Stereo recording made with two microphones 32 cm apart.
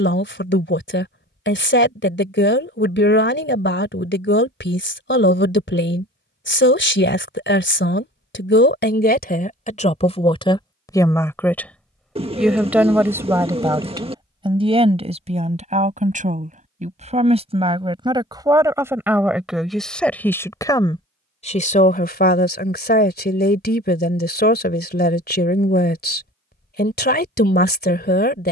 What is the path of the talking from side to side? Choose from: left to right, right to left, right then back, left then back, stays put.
right then back.